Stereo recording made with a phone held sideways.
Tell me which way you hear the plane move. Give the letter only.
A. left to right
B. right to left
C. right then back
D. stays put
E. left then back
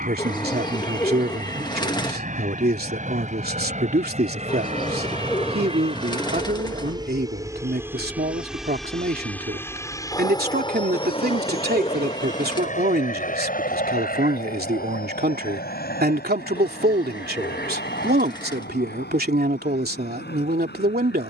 B.